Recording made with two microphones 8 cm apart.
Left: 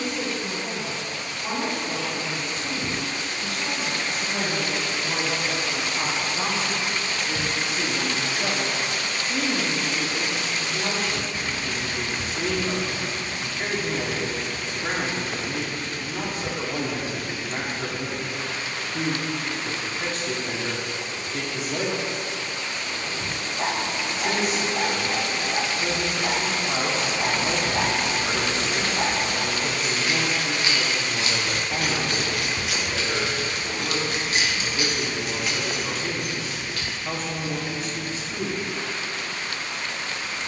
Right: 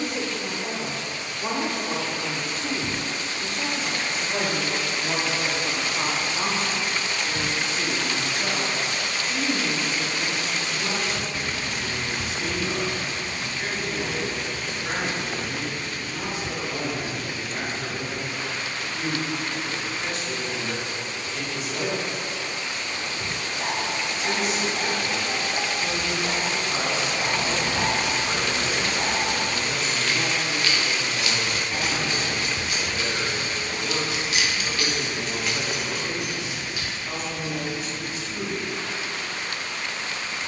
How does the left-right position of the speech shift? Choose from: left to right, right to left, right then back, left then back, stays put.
right to left.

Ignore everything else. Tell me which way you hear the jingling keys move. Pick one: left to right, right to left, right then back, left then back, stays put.
left then back.